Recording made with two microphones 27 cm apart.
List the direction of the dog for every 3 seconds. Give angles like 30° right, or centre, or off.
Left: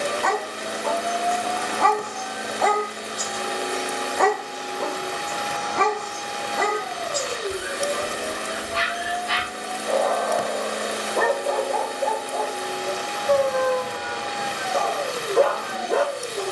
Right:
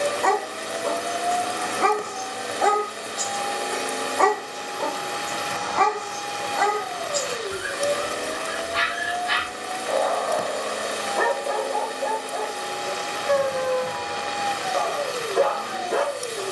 20° right, 10° left, 40° left, 40° left, 40° left, 40° left.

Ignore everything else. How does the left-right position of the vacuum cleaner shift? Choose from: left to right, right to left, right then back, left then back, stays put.
stays put.